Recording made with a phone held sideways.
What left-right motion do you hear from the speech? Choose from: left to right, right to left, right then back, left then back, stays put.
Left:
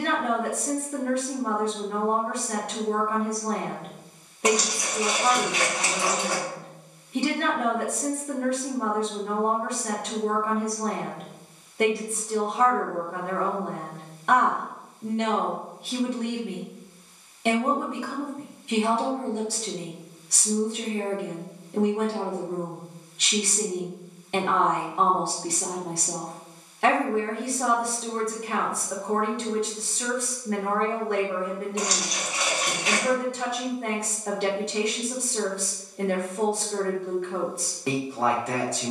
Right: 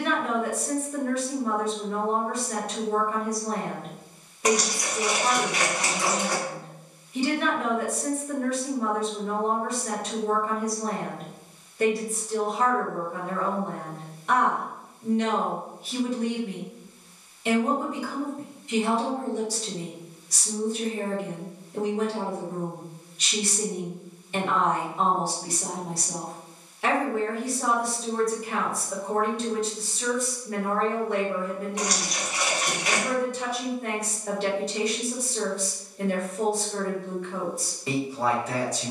stays put.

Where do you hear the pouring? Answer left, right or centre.
left.